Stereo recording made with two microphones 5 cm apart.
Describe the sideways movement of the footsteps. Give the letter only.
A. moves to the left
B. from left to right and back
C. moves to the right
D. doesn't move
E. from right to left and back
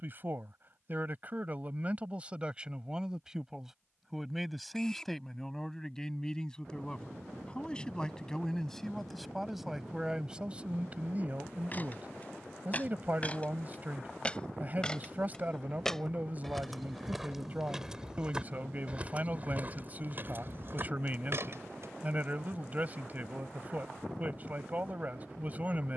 C.